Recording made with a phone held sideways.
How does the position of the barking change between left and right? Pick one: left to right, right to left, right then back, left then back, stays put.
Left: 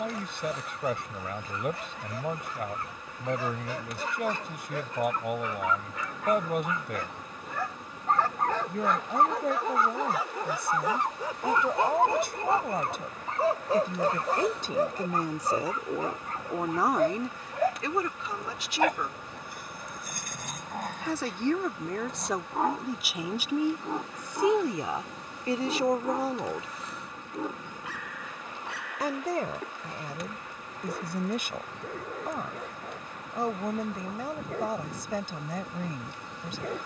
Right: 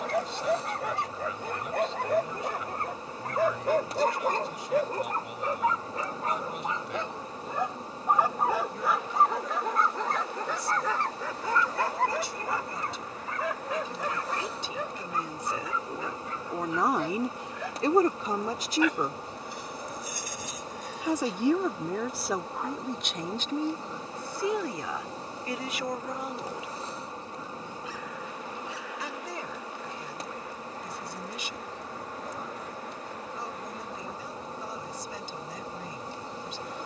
right to left.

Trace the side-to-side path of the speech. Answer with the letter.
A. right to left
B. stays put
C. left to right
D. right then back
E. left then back
D.